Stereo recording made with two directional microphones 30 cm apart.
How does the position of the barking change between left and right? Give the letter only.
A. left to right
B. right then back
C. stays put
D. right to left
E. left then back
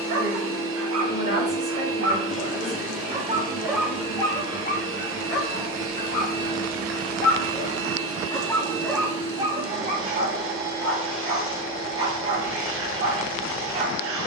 E.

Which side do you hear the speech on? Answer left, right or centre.
right.